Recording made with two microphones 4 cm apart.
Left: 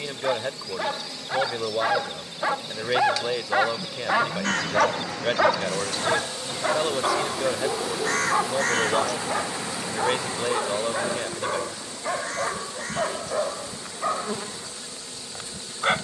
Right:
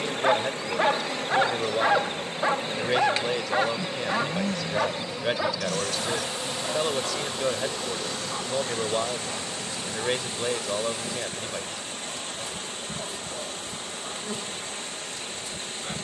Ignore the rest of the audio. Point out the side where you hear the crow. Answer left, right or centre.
left.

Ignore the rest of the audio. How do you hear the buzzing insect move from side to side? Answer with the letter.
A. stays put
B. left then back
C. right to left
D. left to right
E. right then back
C.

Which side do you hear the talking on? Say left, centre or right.
centre.